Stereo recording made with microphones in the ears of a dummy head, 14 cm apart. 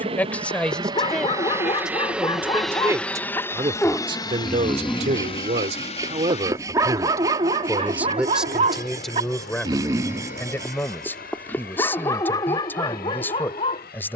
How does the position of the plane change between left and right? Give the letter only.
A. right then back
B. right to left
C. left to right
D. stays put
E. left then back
B.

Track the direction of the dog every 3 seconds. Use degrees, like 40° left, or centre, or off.
30° left, 10° left, 30° right, centre, 30° left.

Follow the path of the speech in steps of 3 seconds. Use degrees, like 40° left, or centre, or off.
centre, 40° right, 20° right, 10° left, 10° left.